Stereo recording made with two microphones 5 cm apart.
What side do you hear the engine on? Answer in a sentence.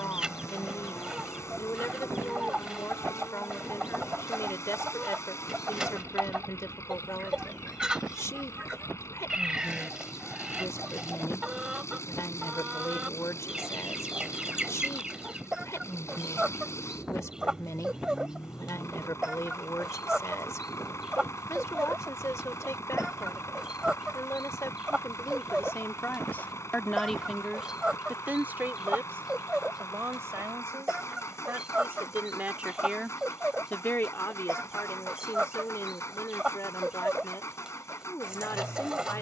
In this clip you hear the engine on the left.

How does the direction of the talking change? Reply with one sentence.
In this clip you hear the talking go right and come back.